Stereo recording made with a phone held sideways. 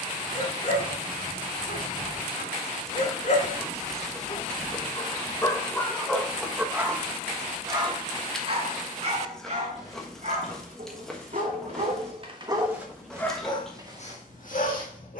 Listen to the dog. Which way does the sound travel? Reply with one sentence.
You can hear the dog move from left to right and back again.